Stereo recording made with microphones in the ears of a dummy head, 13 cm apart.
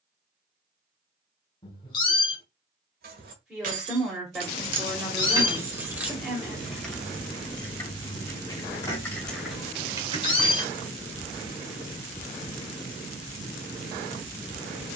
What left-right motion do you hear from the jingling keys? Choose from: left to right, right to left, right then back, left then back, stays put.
left then back.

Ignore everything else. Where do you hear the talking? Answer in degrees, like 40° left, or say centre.
centre.